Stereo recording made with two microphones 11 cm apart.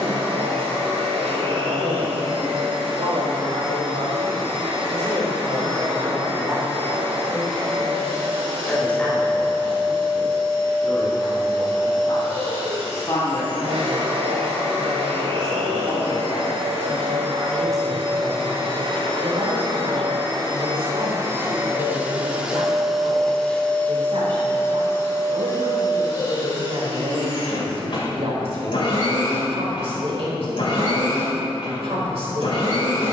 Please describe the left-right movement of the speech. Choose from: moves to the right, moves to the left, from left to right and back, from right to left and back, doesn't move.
from right to left and back.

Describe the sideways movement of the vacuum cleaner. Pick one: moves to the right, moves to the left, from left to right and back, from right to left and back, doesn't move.
moves to the left.